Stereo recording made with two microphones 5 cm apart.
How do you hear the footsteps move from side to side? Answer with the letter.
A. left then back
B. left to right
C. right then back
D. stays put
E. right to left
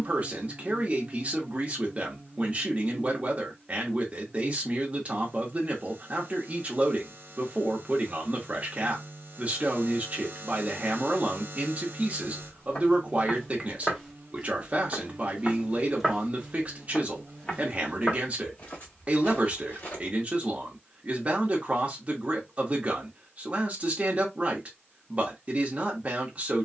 C.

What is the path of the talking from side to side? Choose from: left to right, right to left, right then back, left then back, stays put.
stays put.